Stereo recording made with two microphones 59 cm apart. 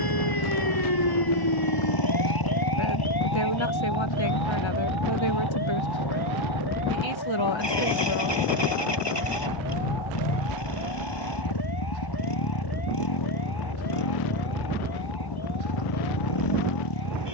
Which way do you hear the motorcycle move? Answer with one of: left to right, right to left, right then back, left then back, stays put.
stays put.